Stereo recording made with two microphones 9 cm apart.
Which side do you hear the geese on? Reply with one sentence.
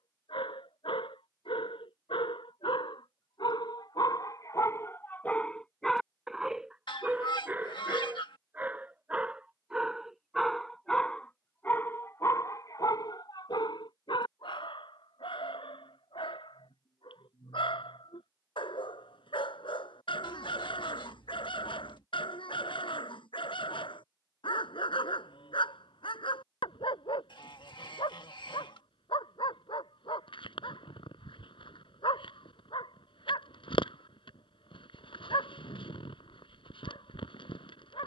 You can hear the geese on the left.